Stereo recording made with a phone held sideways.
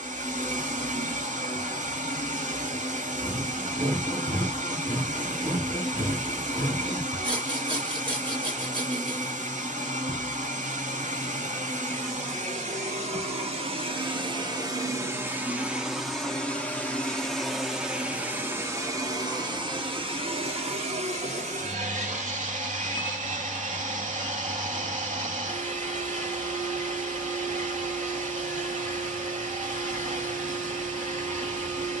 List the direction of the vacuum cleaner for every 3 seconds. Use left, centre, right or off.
right, right, right, right, right, centre, right, right, right, right, right.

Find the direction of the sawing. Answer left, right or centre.
right.